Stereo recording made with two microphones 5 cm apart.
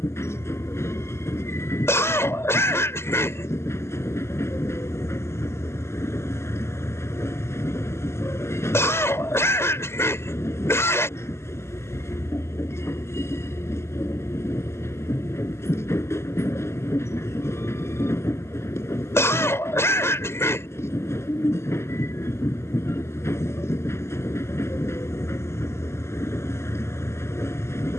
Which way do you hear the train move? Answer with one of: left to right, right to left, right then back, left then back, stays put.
stays put.